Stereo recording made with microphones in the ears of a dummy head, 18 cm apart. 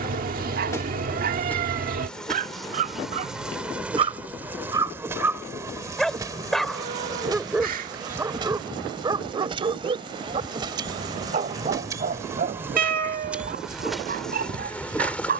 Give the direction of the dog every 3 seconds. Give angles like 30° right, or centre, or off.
40° right, 20° right, 10° right, 30° right, 40° right.